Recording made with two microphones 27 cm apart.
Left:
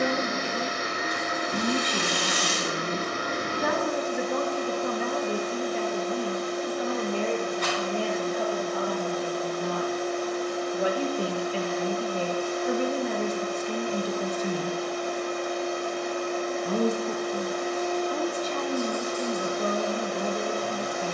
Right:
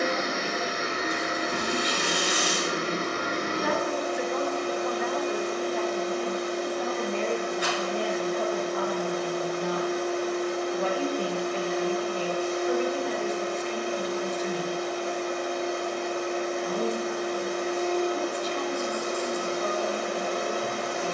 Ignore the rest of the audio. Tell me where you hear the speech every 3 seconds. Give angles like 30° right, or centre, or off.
50° left, 40° left, 10° left, 10° left, 50° left, 50° left, 50° left.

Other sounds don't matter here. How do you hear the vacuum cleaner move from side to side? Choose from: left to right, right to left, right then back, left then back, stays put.
stays put.